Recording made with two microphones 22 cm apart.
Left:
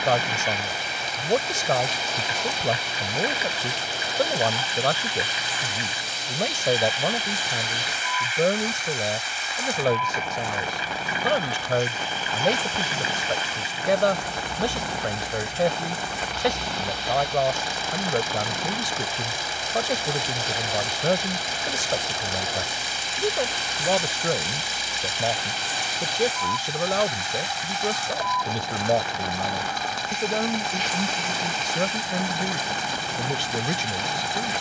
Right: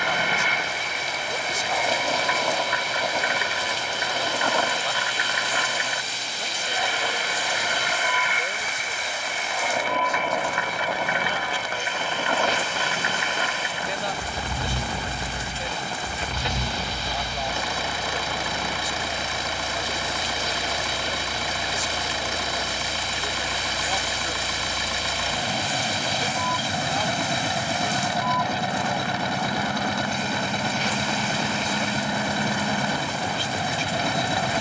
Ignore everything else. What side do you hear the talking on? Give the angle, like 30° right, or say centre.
70° left.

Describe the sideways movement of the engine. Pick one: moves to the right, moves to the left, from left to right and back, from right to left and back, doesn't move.
doesn't move.